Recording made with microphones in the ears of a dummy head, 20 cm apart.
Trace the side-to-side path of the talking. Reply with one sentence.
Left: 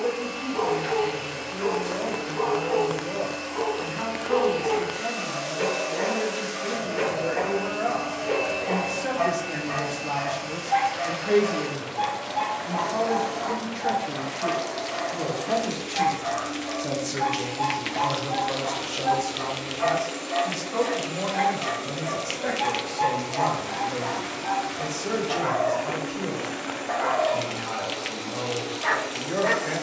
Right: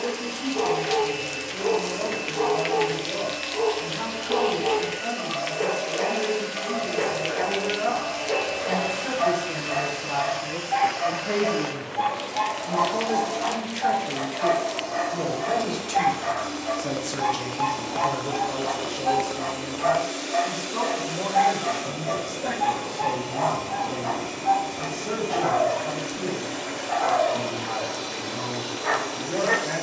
You can hear the talking move from left to right and back again.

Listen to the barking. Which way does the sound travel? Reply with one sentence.
You can hear the barking move from left to right and back again.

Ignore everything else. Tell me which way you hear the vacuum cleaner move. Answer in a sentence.
You can hear the vacuum cleaner stay put.